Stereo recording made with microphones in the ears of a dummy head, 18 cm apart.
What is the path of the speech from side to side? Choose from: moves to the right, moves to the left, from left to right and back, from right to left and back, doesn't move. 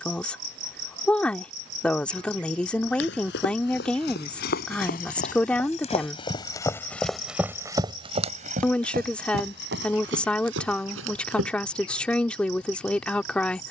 doesn't move.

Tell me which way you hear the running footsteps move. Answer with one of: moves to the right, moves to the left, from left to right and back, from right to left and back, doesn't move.
moves to the right.